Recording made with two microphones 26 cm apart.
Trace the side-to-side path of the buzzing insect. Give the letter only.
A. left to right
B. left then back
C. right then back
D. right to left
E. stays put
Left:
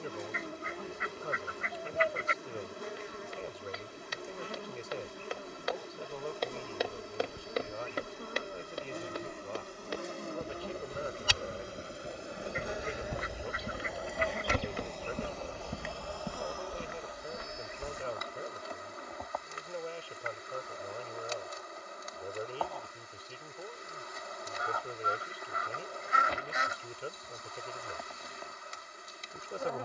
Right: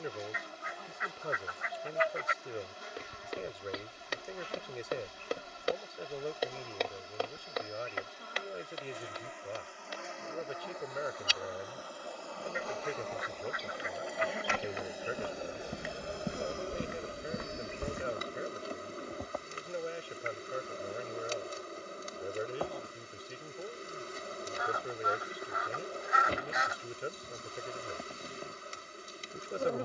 A.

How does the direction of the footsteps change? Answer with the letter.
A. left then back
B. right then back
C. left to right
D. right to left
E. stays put
A.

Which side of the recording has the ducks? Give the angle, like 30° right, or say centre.
30° left.